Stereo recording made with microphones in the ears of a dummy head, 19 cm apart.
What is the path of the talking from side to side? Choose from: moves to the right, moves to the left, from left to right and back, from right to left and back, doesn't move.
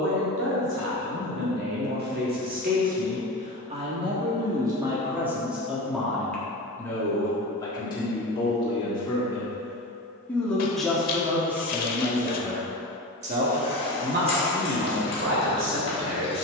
from right to left and back.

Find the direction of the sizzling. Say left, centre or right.
left.